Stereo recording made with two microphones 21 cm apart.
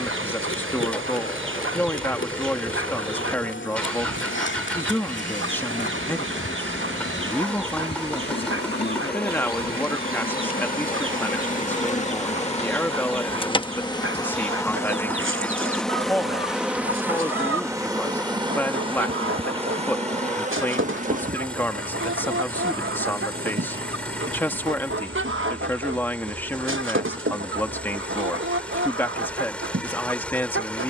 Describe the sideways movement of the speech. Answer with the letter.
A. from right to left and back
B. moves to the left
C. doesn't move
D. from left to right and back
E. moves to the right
C.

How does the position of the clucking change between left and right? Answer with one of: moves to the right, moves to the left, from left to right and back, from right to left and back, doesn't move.
doesn't move.